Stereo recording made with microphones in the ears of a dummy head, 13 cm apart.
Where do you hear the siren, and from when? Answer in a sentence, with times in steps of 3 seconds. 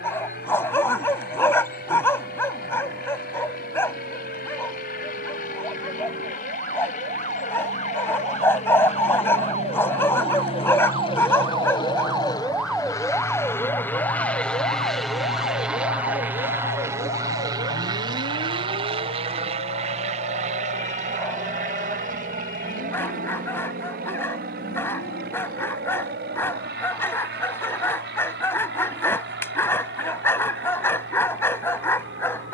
You can hear the siren on the right from 0 s, in the centre from 12 s and on the left from 15 s.